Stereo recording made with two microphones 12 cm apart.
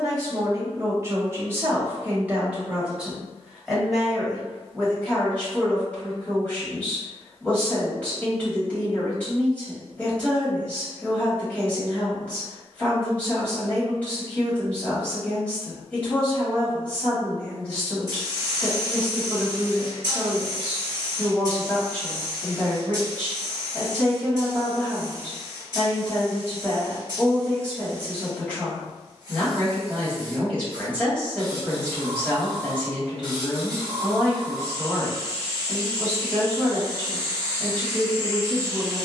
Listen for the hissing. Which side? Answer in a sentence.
You can hear the hissing on the right.